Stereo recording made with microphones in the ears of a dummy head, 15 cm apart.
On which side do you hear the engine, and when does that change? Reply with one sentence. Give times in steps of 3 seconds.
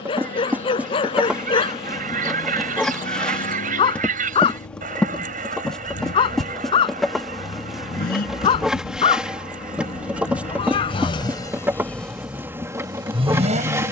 You can hear the engine on the left from 0 s and on the right from 12 s.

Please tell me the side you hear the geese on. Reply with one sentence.
In this clip you hear the geese on the right.